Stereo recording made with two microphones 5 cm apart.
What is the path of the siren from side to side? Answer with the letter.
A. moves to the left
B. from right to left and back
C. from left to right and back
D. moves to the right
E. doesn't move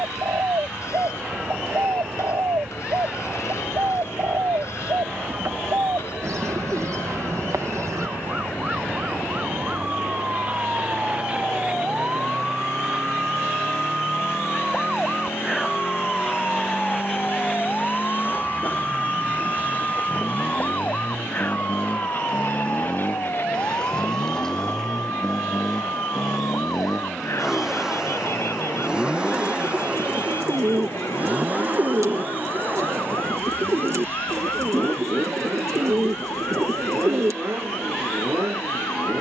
A.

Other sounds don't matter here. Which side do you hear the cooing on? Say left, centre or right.
right.